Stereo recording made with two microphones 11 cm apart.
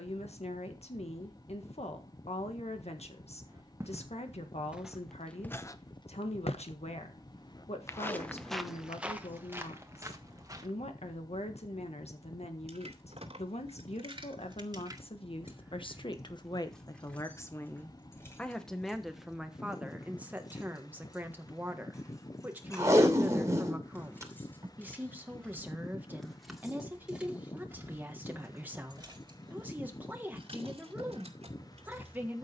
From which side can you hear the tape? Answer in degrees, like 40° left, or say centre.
30° right.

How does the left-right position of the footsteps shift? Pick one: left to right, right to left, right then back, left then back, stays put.
left then back.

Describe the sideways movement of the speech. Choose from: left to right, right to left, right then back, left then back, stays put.
left to right.